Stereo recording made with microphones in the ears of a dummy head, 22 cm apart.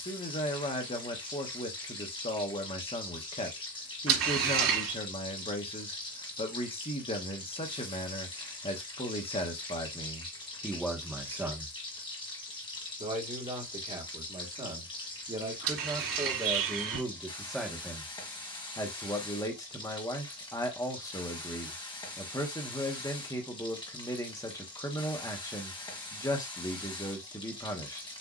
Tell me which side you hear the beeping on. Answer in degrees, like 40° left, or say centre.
60° right.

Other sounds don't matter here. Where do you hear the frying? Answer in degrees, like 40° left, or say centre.
20° left.